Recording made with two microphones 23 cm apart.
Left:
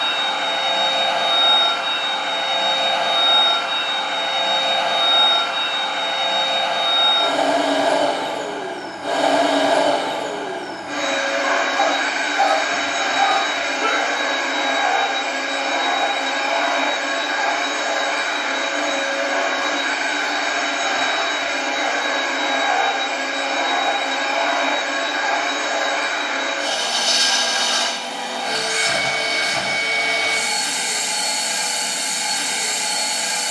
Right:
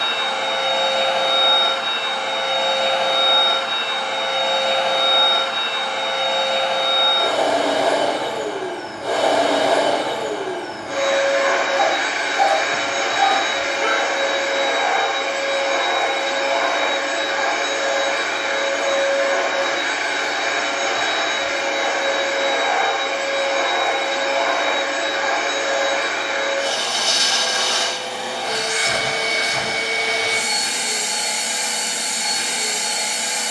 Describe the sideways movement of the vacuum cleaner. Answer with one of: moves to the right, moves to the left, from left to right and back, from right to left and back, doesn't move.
doesn't move.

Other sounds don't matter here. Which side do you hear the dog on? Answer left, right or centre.
centre.